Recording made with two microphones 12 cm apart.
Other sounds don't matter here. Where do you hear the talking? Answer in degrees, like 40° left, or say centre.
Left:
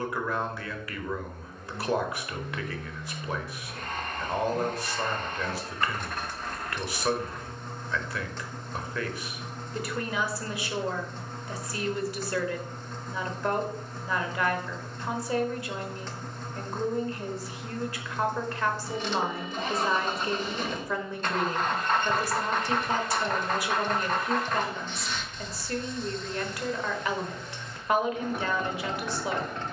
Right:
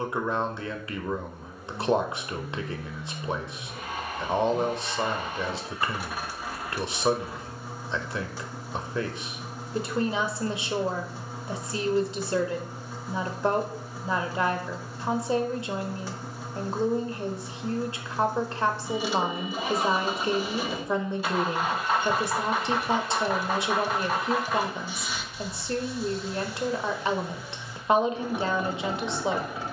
20° right.